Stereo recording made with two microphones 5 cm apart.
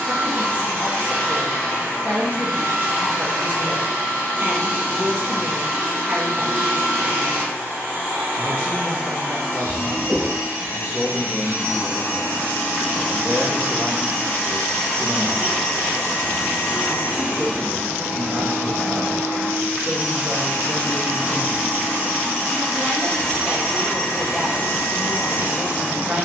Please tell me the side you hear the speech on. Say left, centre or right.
right.